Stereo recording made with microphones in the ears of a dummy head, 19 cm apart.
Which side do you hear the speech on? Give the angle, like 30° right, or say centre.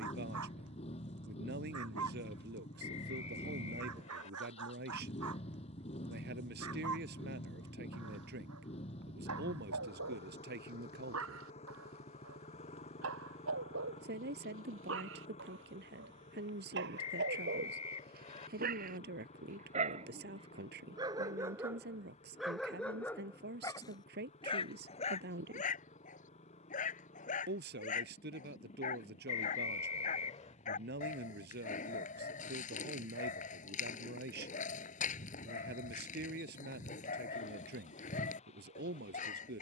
50° right.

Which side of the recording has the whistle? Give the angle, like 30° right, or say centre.
30° left.